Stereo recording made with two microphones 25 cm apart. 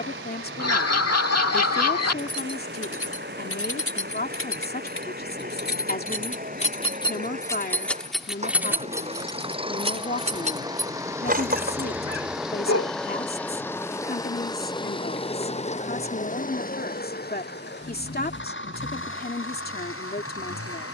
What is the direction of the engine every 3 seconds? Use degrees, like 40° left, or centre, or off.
50° right, 40° right, 30° right, 20° right, 10° left, 30° left, 50° left.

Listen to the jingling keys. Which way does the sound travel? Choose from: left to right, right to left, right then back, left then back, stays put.
left to right.